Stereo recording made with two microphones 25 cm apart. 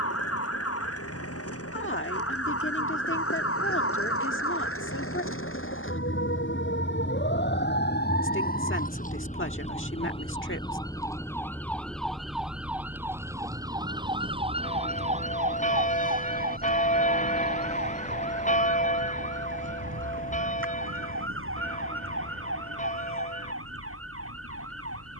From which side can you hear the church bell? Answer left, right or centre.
left.